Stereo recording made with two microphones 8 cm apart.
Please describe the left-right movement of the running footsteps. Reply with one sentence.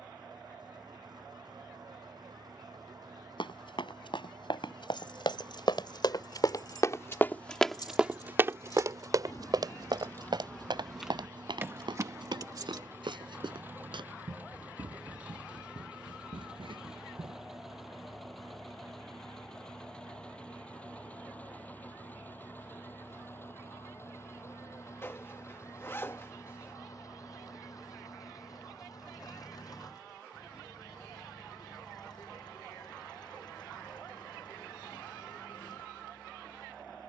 You can hear the running footsteps go from the left side to the right.